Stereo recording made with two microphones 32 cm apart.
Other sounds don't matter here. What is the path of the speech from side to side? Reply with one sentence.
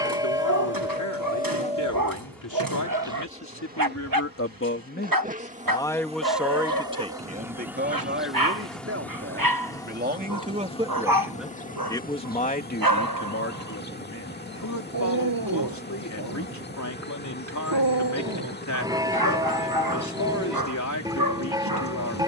You can hear the speech go right and come back.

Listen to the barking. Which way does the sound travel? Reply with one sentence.
In this clip you hear the barking stay put.